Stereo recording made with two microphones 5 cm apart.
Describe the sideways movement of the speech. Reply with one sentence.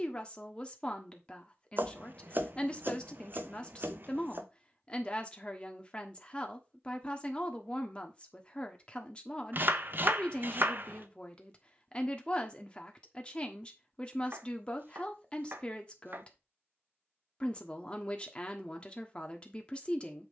You can hear the speech stay in one place.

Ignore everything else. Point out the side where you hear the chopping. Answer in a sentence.
You can hear the chopping on the right.